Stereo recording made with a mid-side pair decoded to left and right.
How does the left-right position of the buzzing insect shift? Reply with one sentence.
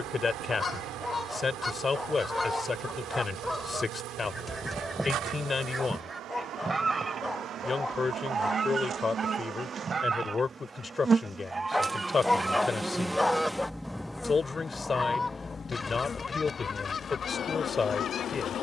In this clip you hear the buzzing insect move to the left.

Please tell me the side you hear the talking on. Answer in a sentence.
You can hear the talking on the left.